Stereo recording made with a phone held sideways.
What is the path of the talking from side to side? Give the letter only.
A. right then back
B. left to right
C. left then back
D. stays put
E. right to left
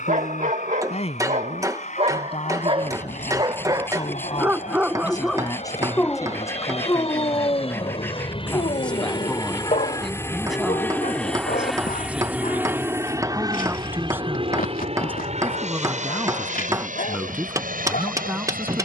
B.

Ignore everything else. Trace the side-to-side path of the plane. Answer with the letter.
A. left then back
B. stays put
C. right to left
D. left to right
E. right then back
D.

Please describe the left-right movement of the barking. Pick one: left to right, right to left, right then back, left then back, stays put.
right to left.